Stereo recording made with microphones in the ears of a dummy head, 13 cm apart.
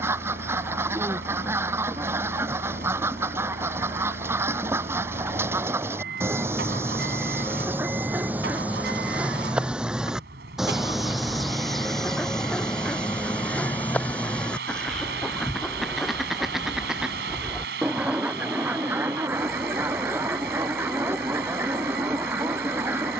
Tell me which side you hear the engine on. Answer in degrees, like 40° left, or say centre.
80° right.